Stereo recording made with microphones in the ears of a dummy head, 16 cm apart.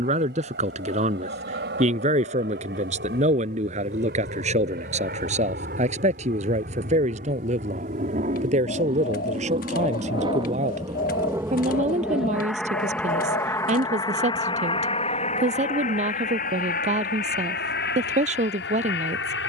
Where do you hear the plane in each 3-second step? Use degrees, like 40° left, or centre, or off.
70° right, 60° right, 50° right, 20° right, 10° left, 40° left, 60° left.